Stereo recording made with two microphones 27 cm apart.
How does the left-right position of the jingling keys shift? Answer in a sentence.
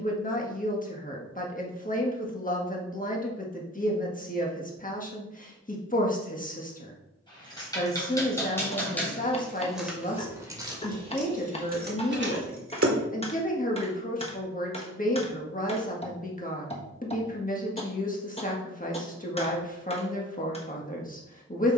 You can hear the jingling keys move from left to right.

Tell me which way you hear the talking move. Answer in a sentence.
In this clip you hear the talking stay in one place.